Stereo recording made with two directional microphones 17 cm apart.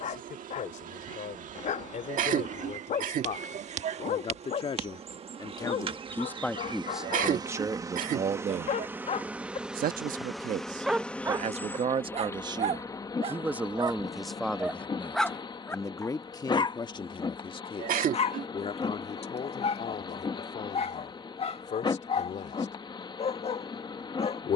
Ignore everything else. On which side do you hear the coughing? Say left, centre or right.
right.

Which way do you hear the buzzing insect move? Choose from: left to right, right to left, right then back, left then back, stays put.
right to left.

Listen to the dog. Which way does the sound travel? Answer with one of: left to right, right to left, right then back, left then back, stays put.
right then back.